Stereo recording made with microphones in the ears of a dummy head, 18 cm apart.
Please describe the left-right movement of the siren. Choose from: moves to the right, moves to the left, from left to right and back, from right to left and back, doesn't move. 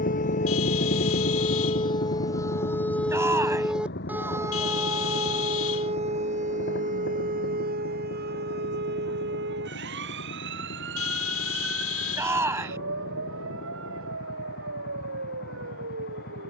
moves to the right.